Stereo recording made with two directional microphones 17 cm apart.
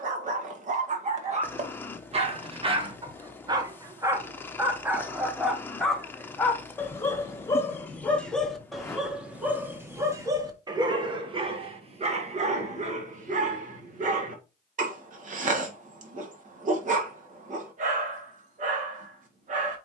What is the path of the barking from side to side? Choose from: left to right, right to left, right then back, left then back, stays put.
left then back.